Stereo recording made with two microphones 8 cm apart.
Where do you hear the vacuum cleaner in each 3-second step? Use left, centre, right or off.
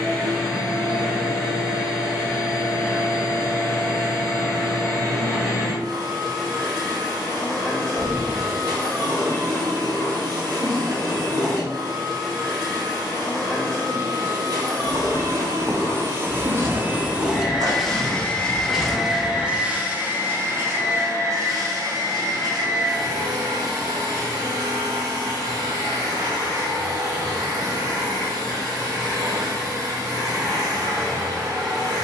right, right, right, right, right, right, centre, right, right, right, right.